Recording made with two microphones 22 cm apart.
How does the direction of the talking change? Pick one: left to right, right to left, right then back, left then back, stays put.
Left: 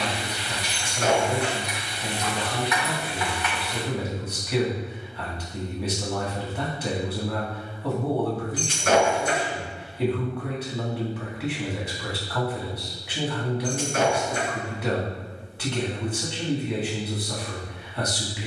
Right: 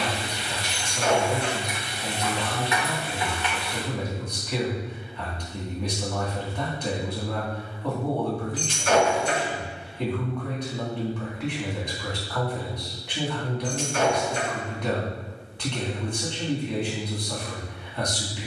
stays put.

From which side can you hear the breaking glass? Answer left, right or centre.
left.